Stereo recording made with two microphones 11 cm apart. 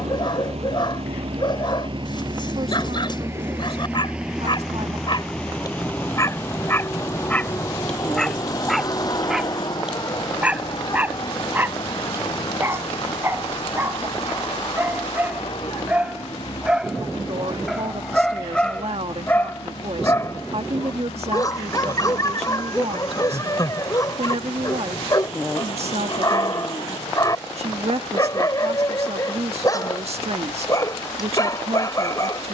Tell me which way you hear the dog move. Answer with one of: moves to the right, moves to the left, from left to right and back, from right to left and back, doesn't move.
from left to right and back.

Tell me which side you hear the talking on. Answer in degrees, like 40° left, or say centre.
60° right.